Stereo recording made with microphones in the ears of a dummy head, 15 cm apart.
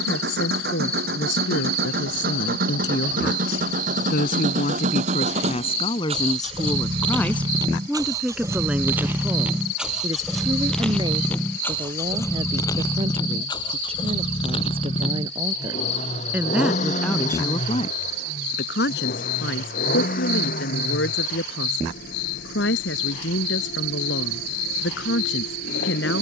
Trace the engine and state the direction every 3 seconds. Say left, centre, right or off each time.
right, right, right, centre, left, left, left, left, left.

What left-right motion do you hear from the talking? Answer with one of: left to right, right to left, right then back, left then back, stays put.
right then back.